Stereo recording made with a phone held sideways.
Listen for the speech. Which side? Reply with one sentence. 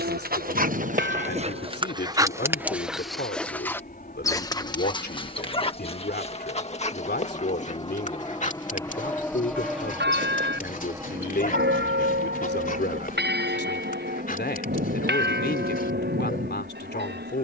In this clip you hear the speech on the left.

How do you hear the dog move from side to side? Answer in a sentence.
You can hear the dog travel towards the left.